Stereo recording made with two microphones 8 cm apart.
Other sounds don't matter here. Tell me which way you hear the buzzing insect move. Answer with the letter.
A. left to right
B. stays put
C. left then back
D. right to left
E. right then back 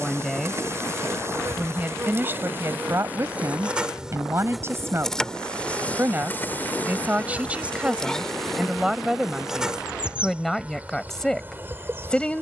C.